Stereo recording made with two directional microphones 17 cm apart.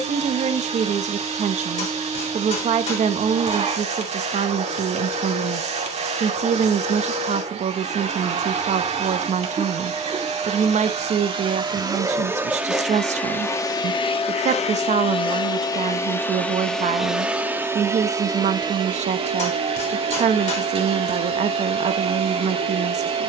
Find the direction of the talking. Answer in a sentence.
You can hear the talking on the right.